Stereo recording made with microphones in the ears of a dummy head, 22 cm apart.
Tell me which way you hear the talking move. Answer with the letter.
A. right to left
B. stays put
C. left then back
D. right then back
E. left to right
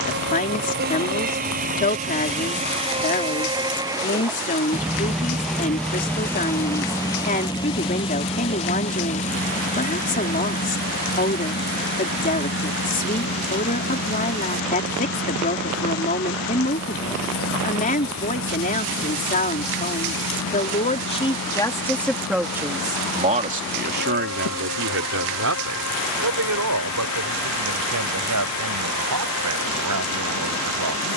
E.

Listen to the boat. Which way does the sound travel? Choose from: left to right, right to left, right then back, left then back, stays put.
right to left.